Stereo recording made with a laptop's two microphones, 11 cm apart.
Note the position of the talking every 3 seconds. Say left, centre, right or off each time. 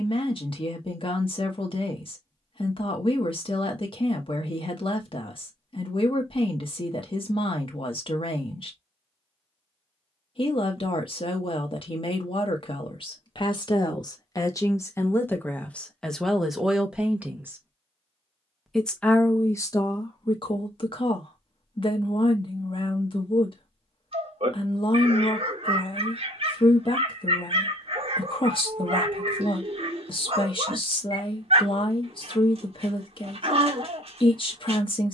left, left, left, left, left, centre, left, left, left, left, left, left.